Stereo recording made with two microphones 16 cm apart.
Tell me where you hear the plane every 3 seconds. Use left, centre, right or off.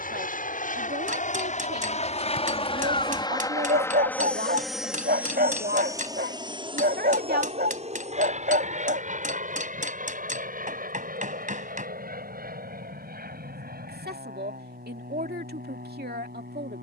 left, centre, right, right, right, right.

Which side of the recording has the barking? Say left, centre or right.
right.